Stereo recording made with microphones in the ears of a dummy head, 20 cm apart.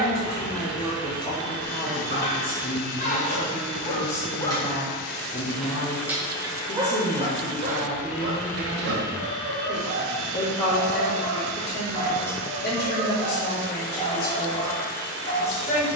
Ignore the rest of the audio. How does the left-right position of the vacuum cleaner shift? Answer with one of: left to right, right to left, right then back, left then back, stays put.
left to right.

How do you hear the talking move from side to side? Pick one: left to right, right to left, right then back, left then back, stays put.
stays put.